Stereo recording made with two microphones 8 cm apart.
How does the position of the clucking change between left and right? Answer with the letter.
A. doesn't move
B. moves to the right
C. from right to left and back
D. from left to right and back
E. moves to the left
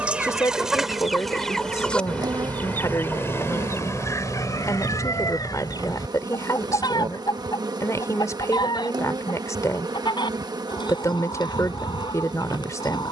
E.